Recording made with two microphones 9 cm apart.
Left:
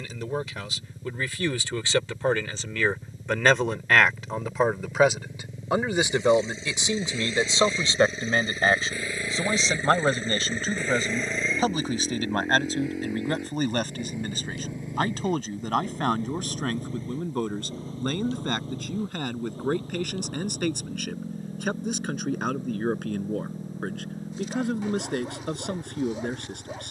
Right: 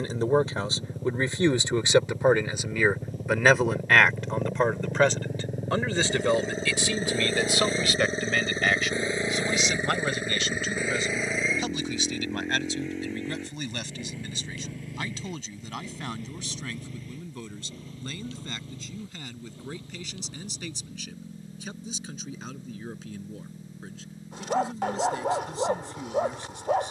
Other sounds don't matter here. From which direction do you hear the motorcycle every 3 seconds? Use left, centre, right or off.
right, right, right, centre, centre, left, left, left, left.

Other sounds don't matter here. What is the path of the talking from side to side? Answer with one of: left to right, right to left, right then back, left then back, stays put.
right to left.